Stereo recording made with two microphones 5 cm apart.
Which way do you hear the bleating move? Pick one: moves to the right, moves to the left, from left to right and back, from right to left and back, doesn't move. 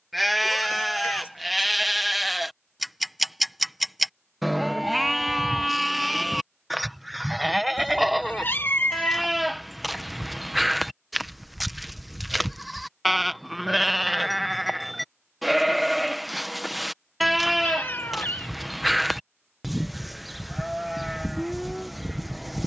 doesn't move.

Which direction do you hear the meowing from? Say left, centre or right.
left.